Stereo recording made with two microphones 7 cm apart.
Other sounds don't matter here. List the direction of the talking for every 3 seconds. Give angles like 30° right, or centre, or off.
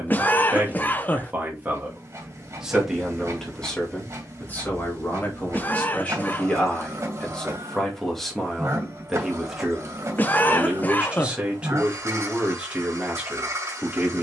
20° right, 20° left, 10° left, 10° right, 20° right.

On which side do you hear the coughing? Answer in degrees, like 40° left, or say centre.
20° left.